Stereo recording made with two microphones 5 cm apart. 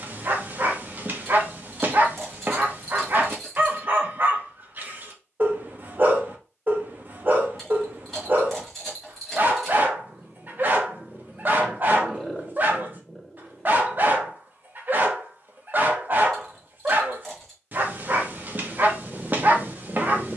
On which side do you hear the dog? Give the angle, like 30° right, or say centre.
40° right.